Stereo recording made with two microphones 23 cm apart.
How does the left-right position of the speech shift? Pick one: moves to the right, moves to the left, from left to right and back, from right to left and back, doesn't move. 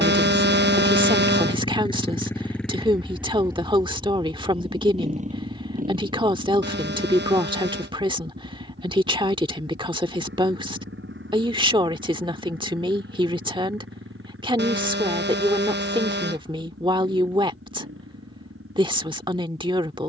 doesn't move.